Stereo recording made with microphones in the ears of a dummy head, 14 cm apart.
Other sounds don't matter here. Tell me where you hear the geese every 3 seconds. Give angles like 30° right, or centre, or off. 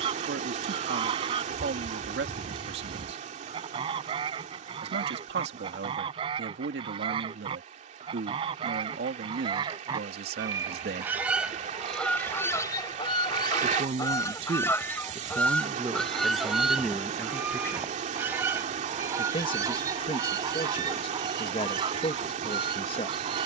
30° right, 30° right, 30° right, 20° right, 20° left, centre, 20° right, 30° right.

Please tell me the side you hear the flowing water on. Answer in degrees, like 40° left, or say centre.
50° right.